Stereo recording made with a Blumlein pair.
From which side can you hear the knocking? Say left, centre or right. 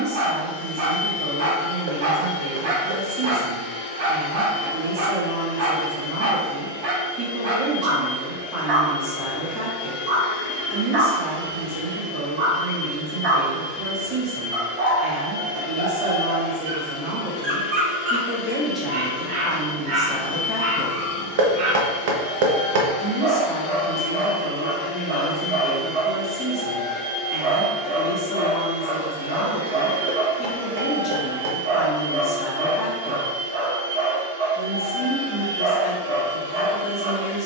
right.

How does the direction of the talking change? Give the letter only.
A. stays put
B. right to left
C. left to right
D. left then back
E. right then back
B.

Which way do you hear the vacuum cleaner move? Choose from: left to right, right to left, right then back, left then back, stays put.
left to right.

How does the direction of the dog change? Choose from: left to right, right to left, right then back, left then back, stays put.
stays put.